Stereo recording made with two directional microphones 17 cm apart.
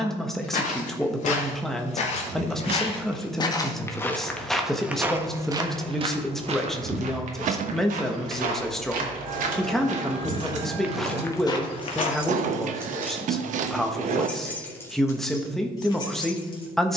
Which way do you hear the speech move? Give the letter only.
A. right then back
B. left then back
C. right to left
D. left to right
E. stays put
E.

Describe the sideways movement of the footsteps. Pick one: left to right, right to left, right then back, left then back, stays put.
right then back.